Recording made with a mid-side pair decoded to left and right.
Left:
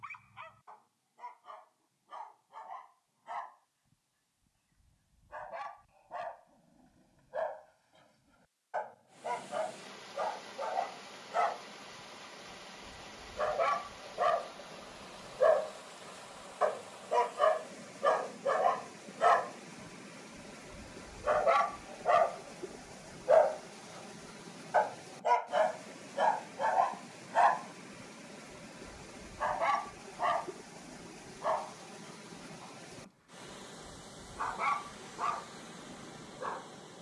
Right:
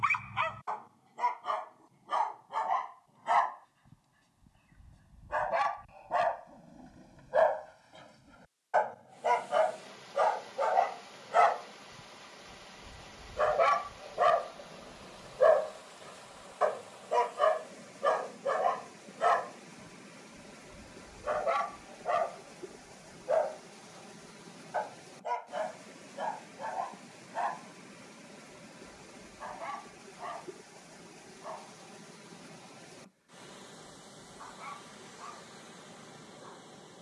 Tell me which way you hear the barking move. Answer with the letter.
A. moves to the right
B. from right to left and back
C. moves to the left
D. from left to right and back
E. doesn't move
C.